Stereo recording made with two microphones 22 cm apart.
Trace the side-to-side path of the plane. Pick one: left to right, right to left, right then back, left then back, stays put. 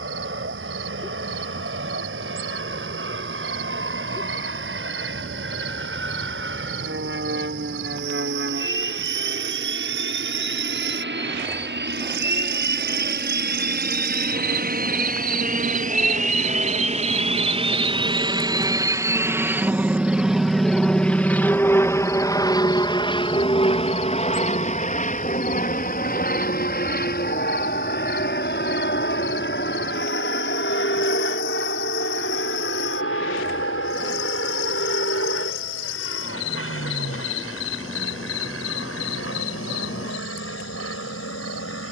right to left.